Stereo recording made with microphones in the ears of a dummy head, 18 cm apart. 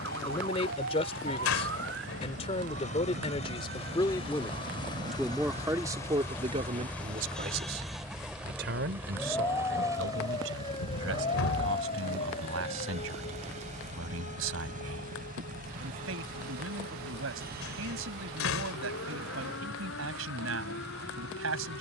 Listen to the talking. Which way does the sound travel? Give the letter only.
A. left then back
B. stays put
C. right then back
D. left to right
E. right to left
D.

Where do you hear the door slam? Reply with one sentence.
You can hear the door slam on the left.